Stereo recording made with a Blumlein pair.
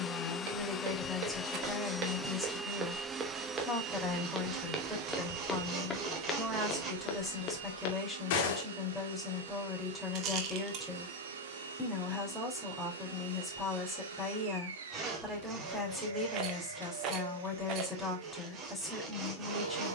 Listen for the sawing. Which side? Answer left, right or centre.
right.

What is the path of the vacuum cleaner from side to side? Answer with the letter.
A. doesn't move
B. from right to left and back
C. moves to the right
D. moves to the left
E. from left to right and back
C.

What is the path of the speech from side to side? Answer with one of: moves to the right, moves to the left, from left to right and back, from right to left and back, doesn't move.
doesn't move.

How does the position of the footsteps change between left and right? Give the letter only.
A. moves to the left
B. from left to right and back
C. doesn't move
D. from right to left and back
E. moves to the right
A.